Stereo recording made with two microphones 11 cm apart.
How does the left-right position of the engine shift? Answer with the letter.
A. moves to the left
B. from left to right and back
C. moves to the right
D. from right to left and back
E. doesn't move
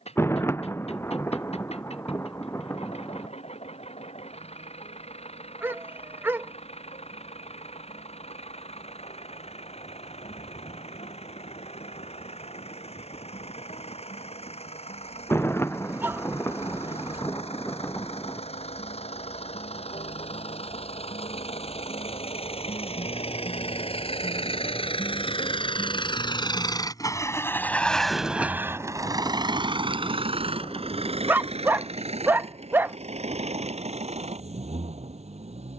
C.